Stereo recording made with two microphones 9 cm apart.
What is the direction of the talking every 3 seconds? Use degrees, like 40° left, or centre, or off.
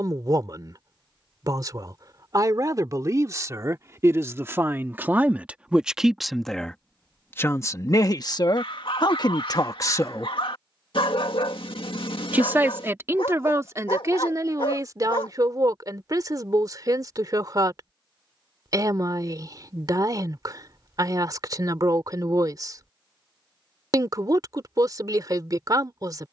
40° right, 30° right, 30° left, 40° left, 30° right, 40° right, 40° right, 40° right, 40° right.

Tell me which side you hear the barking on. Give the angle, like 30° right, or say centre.
70° left.